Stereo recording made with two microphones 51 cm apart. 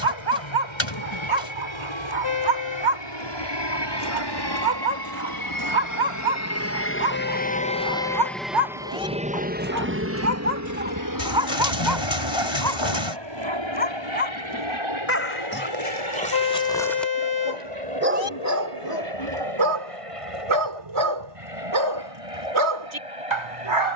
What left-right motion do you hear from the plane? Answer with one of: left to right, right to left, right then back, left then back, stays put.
left to right.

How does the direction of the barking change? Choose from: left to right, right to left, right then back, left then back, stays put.
left then back.